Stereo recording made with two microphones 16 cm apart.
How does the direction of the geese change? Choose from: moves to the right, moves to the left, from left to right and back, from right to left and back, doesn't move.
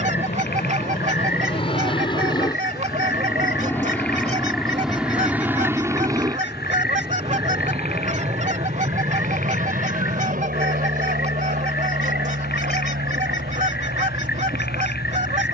doesn't move.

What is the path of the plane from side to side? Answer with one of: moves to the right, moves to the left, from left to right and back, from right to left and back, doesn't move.
moves to the right.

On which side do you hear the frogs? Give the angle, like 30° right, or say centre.
80° left.